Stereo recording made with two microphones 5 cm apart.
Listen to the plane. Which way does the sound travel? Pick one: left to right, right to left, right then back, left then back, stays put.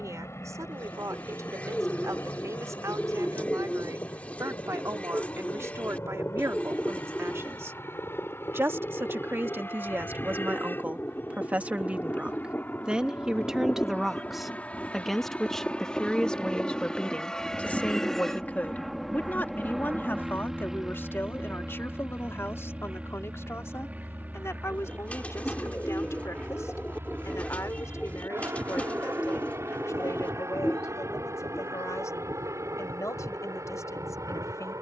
left to right.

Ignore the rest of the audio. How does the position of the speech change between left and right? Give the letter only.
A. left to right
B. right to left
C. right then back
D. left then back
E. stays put
B.